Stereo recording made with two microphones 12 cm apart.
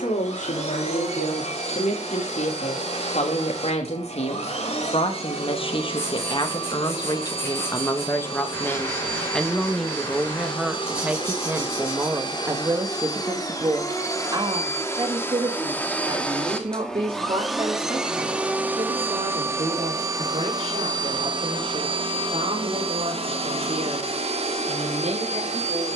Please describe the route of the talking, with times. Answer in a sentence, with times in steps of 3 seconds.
You can hear the talking on the left from 0 s, in the centre from 9 s and on the right from 12 s.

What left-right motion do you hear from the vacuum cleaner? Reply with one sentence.
You can hear the vacuum cleaner move from left to right.